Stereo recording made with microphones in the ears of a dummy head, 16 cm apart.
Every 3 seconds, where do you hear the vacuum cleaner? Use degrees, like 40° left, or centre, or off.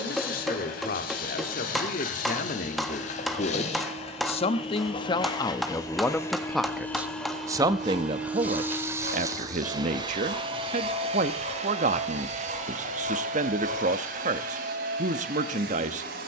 50° left, 30° left, centre, 30° right, 50° right, 60° right.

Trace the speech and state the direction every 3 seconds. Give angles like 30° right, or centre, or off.
50° left, 30° left, 20° right, 40° right, 40° right, 40° right.